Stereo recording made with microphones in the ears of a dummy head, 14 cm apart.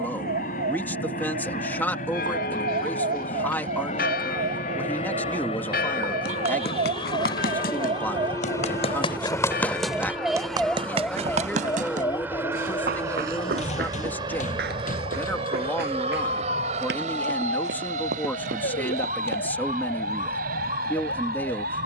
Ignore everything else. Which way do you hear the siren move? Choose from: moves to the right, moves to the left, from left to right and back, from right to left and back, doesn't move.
moves to the left.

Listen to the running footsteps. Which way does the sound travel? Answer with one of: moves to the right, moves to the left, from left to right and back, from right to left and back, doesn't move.
moves to the right.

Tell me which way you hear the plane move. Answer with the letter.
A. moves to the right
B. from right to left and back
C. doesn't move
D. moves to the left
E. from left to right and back
A.